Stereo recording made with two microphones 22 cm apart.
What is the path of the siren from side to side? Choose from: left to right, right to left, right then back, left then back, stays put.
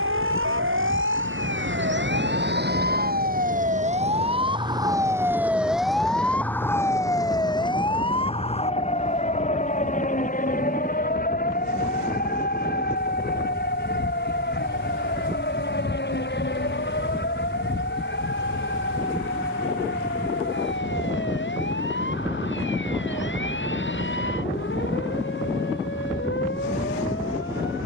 right to left.